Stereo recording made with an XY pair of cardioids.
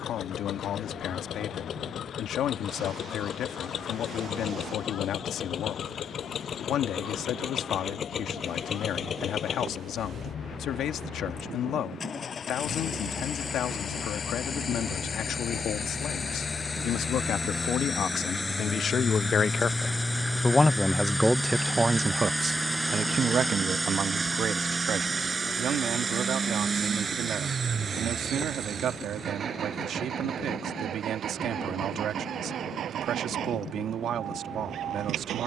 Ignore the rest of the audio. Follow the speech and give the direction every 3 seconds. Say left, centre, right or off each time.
left, left, left, left, left, left, left, right, right, right, right, right.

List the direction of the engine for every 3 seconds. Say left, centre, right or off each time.
left, left, left, left, left, left, centre, centre, right, right, right, right.